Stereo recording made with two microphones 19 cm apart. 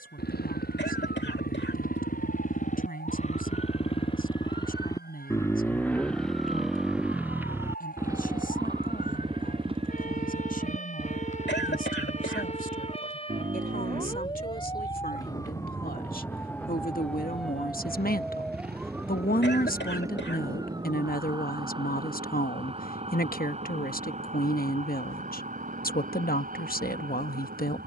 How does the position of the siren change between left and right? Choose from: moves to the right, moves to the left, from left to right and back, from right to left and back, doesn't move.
moves to the right.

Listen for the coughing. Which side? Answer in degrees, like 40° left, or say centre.
70° left.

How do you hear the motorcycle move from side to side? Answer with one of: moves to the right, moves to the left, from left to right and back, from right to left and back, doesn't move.
moves to the right.